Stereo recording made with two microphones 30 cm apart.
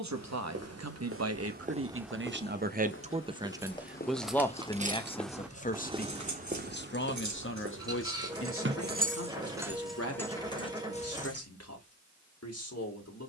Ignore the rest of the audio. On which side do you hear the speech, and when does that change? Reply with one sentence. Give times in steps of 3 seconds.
In this clip you hear the speech on the right from 0 s, in the centre from 3 s and on the left from 6 s.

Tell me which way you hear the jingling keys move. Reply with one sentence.
In this clip you hear the jingling keys move from left to right and back again.